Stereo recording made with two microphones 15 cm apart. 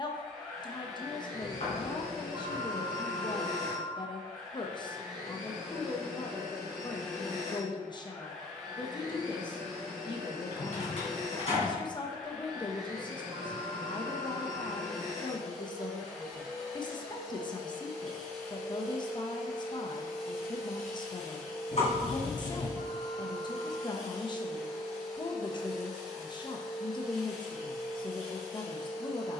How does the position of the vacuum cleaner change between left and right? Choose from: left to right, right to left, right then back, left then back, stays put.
stays put.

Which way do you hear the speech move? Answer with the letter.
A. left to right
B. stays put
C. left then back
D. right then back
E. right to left
B.